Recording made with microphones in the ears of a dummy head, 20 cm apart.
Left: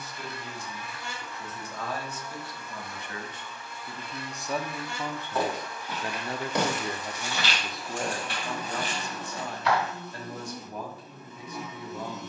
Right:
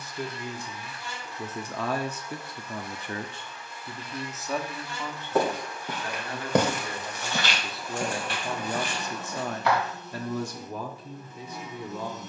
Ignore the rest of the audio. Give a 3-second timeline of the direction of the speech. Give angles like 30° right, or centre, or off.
60° right, centre, centre, 60° right.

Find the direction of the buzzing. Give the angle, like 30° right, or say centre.
70° left.